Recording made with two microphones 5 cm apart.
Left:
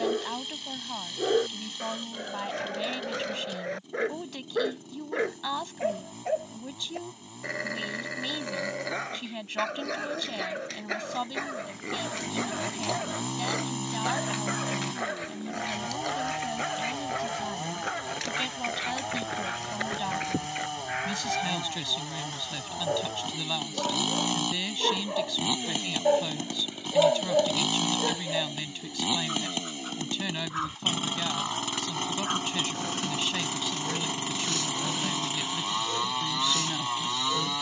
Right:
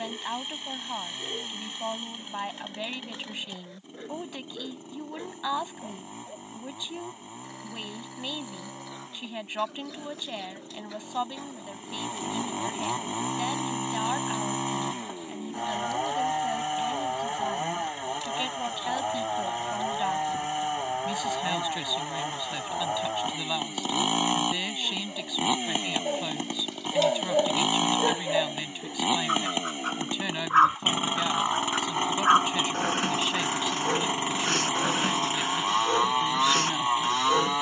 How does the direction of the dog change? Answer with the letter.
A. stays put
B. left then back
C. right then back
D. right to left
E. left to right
E.